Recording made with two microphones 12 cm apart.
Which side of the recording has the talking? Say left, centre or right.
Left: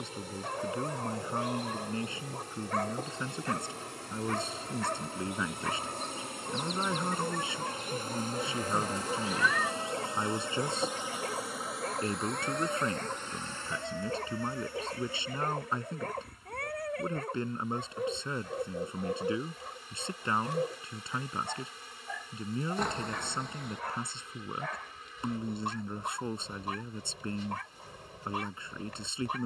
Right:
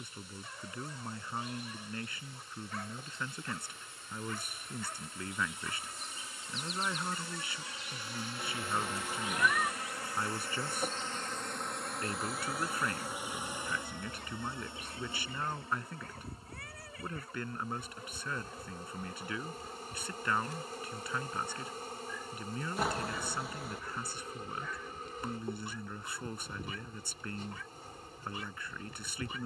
left.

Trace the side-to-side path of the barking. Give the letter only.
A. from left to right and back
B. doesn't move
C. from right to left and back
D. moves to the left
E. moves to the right
B.